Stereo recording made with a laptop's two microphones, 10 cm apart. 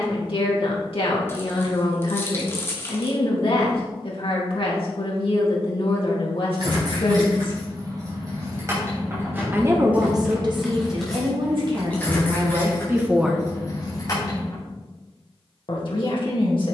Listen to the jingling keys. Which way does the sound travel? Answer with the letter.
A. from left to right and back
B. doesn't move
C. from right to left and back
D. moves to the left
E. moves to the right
D.